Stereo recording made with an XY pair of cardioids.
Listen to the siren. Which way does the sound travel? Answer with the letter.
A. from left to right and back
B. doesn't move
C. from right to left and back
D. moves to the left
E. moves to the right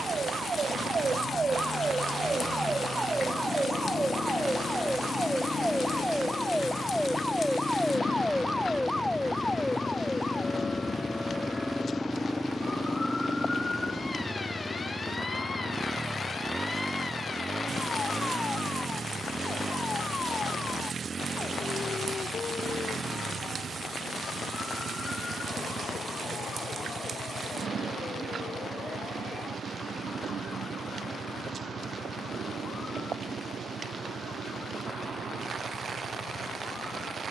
D.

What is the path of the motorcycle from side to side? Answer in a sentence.
You can hear the motorcycle move from left to right.